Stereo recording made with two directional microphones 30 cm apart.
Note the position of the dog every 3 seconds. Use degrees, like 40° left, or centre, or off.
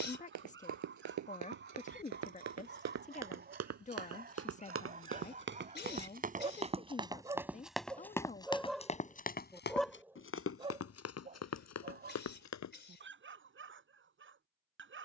40° right, 30° right, 10° right, 10° right, 40° right.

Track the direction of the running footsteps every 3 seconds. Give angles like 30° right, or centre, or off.
60° right, 40° right, 10° right, 40° left, 60° left.